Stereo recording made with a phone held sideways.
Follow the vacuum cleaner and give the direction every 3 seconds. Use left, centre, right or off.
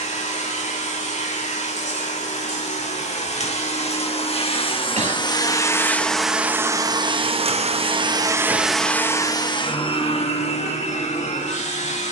left, left, right, left.